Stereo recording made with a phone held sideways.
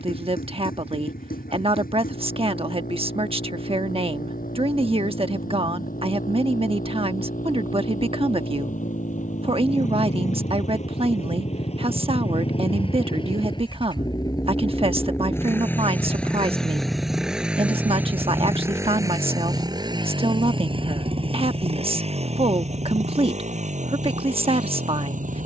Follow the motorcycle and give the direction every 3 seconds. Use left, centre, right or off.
left, left, left, left, left, centre, right, right, right.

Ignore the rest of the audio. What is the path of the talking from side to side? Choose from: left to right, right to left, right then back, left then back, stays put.
stays put.